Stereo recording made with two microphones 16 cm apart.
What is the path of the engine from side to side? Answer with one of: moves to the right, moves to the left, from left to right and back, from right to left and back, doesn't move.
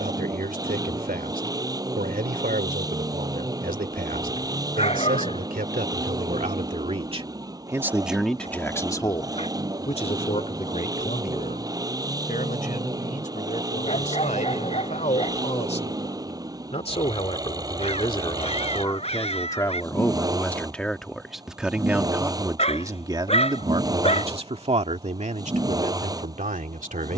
doesn't move.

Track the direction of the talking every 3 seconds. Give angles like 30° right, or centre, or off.
70° right, 70° right, 20° right, 50° left, 50° left, 40° left, 20° left, 20° right, 50° right.